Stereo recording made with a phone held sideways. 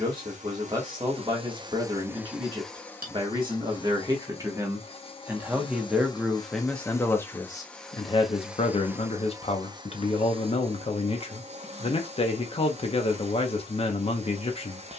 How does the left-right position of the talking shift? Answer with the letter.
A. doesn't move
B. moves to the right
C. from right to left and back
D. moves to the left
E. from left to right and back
D.